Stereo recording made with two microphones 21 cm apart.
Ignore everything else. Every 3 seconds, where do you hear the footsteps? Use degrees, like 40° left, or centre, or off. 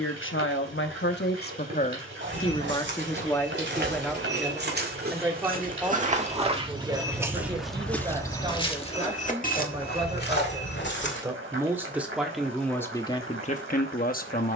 60° right, 50° right, centre, 50° left, off.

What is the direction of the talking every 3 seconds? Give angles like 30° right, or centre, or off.
50° left, centre, 20° right, 20° right, 20° left.